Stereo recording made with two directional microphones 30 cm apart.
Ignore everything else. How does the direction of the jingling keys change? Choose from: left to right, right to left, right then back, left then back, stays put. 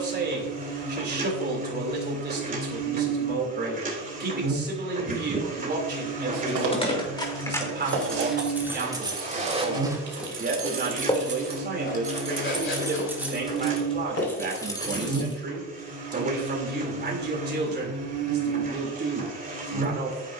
right then back.